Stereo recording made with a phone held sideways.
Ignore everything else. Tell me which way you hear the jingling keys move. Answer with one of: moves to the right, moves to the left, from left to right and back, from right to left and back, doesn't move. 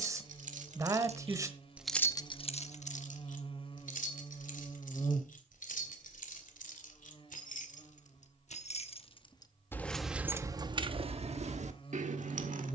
from right to left and back.